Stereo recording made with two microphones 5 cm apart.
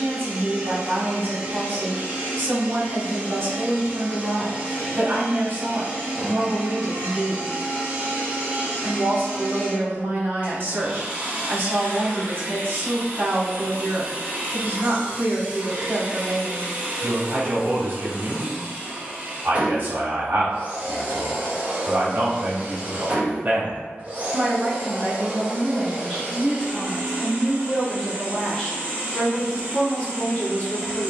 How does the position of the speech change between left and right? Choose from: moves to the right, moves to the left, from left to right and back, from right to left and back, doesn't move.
moves to the left.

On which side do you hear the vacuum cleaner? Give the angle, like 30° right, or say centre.
30° right.